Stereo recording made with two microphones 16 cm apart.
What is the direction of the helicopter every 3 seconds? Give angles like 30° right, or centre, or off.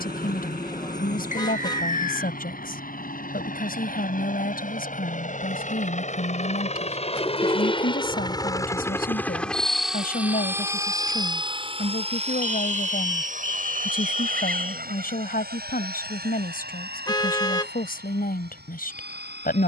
70° left, 60° left, 30° left, 10° right, 50° right, 70° right, 70° right.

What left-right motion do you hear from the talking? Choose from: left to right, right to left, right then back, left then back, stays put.
stays put.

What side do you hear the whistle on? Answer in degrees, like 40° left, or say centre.
50° left.